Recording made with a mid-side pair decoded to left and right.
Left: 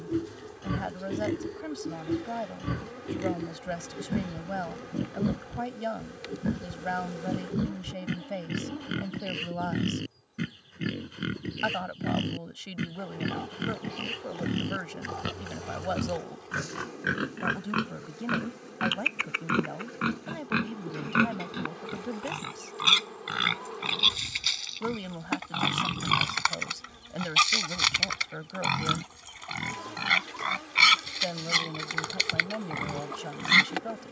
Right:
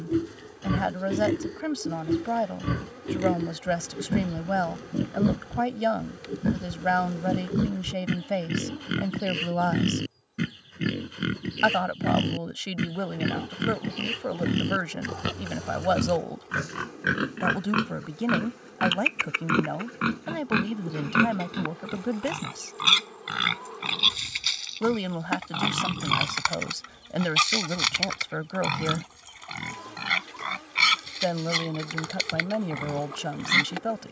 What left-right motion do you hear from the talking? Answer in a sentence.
In this clip you hear the talking stay put.